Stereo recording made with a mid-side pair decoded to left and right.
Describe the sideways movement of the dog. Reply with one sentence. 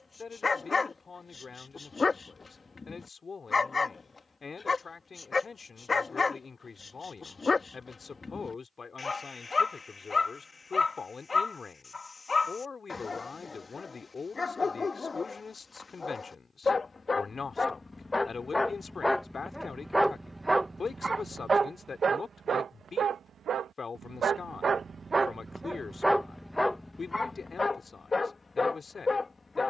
In this clip you hear the dog move from left to right and back again.